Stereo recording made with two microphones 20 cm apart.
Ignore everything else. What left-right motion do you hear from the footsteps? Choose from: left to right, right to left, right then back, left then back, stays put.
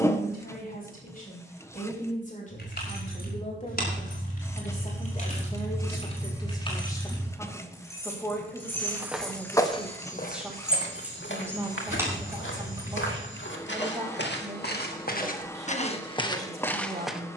left then back.